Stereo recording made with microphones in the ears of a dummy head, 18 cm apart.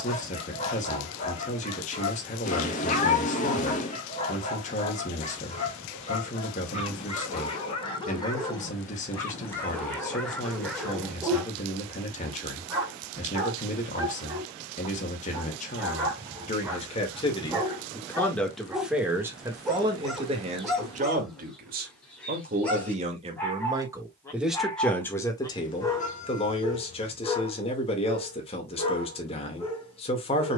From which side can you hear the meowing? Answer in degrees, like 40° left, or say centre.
40° left.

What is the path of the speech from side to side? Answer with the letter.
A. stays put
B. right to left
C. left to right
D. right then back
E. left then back
D.